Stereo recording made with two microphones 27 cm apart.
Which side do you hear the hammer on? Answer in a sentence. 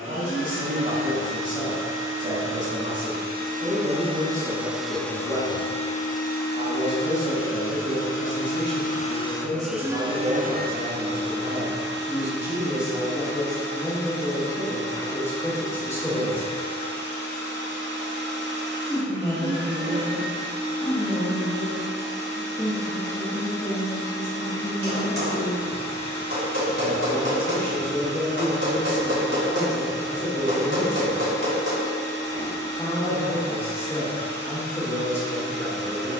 In this clip you hear the hammer on the right.